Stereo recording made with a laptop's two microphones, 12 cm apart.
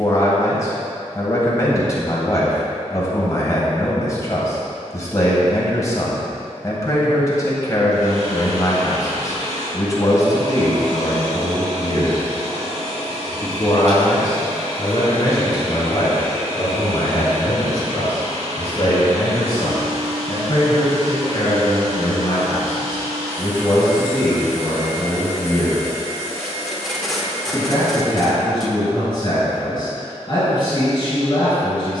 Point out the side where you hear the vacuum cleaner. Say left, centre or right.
right.